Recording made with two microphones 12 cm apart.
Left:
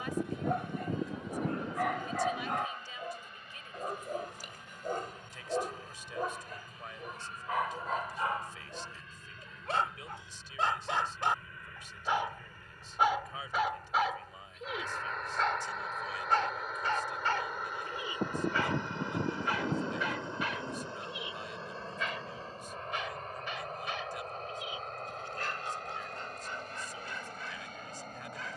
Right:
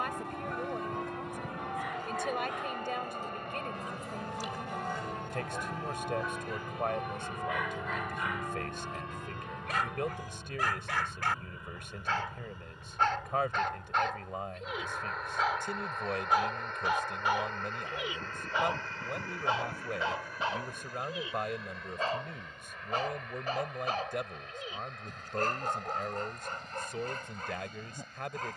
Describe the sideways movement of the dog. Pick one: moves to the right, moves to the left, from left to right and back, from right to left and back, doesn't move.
moves to the right.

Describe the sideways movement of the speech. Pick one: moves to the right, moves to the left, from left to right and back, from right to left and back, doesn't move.
doesn't move.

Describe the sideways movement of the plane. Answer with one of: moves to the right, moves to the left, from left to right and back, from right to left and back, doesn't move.
moves to the left.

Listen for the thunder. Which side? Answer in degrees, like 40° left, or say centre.
70° left.